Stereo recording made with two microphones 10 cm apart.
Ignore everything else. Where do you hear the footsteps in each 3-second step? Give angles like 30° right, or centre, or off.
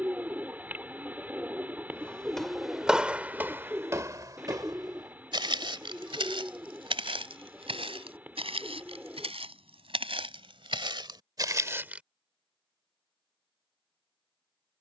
centre, 40° right, 70° right, 60° right, off.